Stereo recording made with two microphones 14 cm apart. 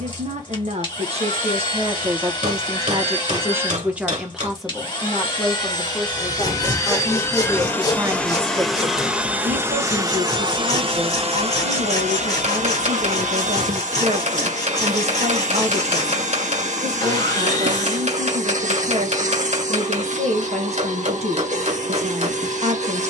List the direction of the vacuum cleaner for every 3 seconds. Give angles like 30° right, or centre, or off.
40° left, 40° left, 20° left, 30° right, 60° right, 60° right, 60° right, 60° right.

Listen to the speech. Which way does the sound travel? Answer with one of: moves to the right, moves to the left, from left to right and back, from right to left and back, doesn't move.
from right to left and back.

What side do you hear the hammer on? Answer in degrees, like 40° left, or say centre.
60° right.